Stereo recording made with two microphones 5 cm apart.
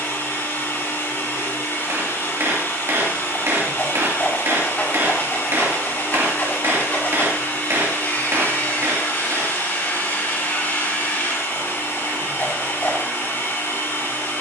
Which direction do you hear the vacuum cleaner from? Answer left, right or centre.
left.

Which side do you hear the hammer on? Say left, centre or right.
right.